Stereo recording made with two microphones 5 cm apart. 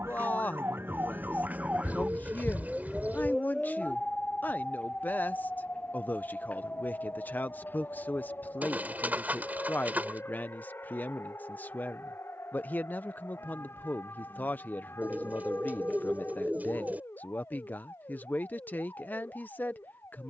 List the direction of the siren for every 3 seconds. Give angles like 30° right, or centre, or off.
40° right, 20° left, 40° left, 50° left, 50° left, 60° left, 60° left.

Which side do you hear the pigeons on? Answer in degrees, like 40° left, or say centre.
30° right.